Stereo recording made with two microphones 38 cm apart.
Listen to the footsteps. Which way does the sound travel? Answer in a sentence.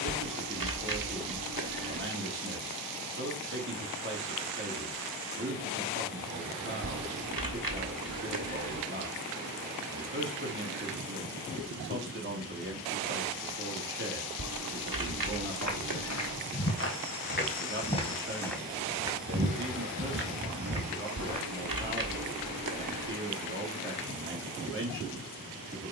You can hear the footsteps move to the right.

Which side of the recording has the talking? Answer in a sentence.
You can hear the talking on the right.